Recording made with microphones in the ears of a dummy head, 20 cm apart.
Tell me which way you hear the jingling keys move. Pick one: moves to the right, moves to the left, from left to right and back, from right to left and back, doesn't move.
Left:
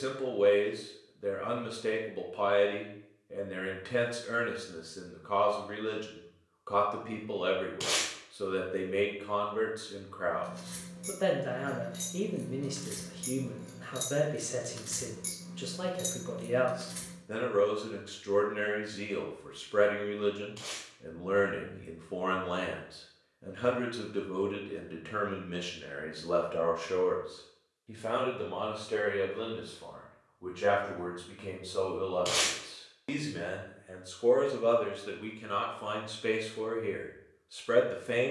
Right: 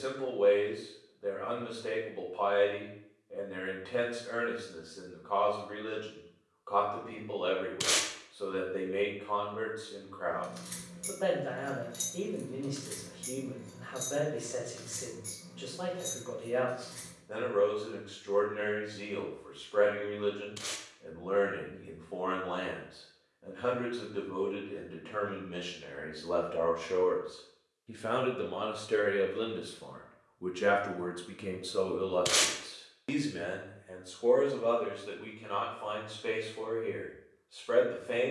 moves to the left.